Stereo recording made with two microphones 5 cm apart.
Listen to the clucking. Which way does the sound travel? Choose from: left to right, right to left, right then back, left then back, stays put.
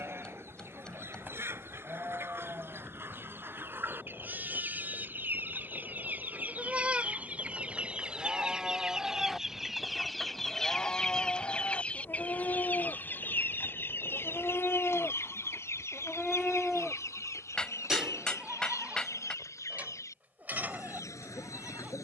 right to left.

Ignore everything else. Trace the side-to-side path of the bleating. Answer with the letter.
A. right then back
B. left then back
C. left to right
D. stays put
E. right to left
B.